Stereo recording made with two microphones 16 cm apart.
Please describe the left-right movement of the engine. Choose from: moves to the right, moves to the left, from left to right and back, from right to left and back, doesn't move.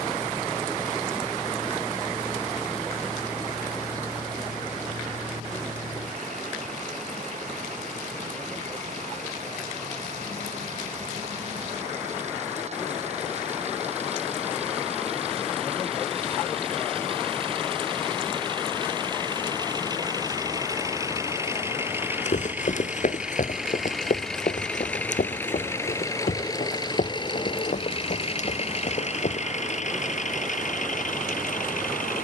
moves to the left.